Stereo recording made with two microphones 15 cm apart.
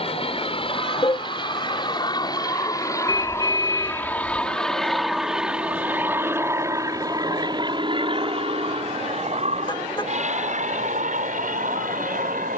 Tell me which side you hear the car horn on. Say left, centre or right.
left.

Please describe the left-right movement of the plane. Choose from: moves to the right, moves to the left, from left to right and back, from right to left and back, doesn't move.
moves to the right.